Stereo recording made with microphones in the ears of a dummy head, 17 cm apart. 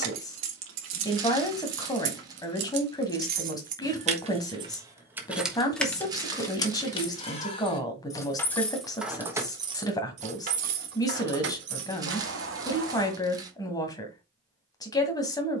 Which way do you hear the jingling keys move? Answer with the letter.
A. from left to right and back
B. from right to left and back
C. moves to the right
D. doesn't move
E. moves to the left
B.